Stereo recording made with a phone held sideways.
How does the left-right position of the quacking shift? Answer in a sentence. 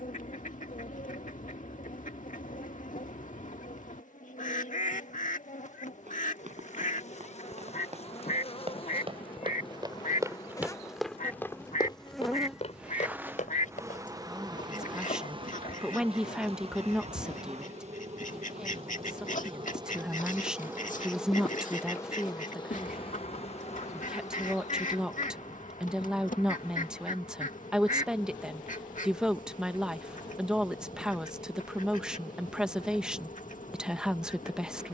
You can hear the quacking stay in one place.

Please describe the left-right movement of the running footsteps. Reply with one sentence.
You can hear the running footsteps travel towards the left.